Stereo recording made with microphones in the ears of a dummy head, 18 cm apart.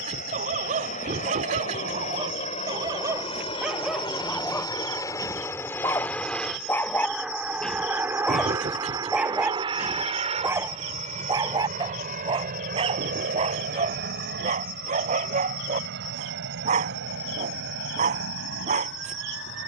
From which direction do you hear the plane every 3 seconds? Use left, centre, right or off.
left, left, centre, right, right, right, right.